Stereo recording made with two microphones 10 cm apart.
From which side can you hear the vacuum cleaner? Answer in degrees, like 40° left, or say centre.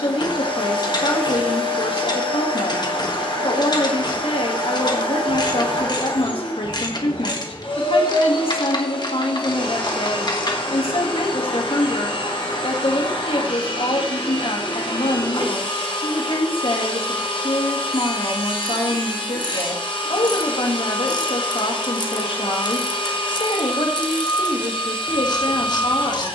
70° left.